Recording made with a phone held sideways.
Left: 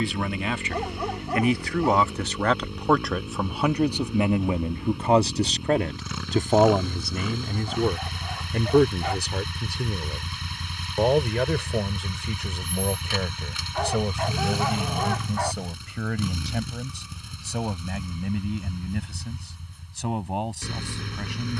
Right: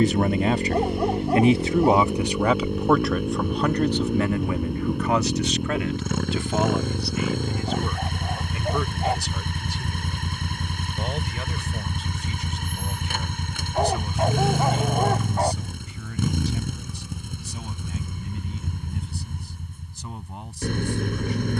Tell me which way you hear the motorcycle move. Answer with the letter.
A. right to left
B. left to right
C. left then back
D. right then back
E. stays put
E.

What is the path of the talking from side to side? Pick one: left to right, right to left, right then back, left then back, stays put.
right to left.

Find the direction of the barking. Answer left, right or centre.
right.